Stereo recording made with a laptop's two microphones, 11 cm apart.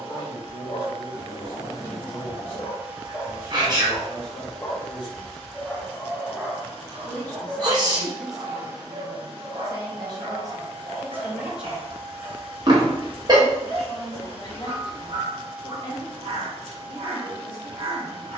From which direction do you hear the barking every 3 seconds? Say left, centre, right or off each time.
left, left, right, right, right, right.